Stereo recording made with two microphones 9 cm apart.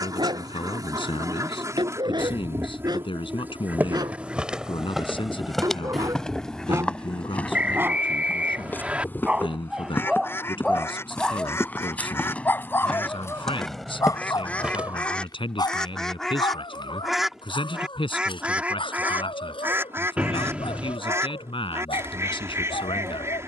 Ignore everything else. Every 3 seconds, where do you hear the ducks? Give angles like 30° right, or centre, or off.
40° right, 10° right, 10° left, 20° left, 20° left, centre, 20° right, 30° right.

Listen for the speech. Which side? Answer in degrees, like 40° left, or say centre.
70° left.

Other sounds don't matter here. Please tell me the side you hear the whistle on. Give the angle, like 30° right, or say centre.
10° right.